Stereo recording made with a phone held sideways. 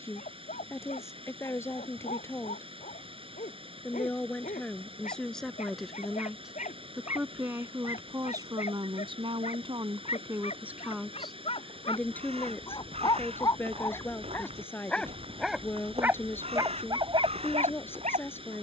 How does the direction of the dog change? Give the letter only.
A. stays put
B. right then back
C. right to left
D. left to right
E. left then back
D.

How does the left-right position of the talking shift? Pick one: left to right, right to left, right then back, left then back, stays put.
right then back.